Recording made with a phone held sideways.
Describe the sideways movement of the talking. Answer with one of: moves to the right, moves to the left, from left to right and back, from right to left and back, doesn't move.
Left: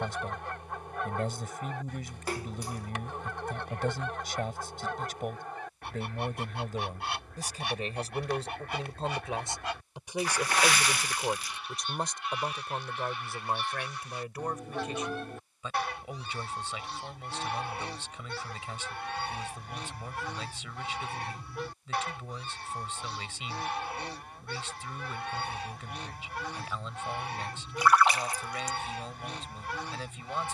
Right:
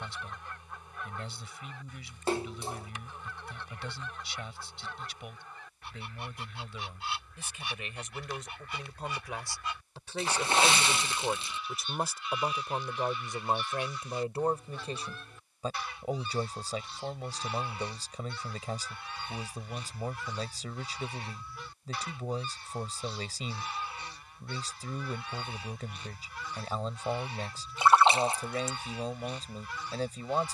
moves to the right.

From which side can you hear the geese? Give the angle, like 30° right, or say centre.
60° left.